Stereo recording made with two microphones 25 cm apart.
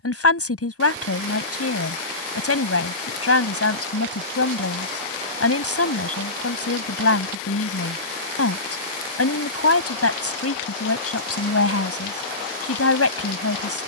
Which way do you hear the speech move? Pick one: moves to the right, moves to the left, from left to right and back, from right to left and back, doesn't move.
doesn't move.